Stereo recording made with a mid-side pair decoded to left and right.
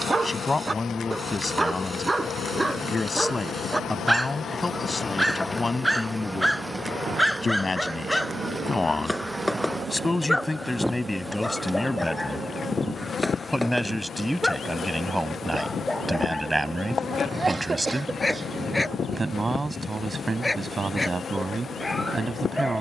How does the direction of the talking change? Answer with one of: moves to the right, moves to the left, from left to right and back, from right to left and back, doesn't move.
moves to the right.